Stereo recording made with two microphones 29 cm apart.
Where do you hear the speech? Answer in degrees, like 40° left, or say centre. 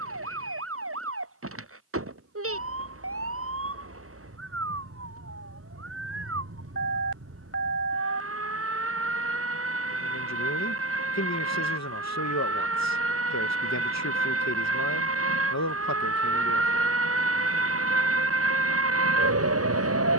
60° left.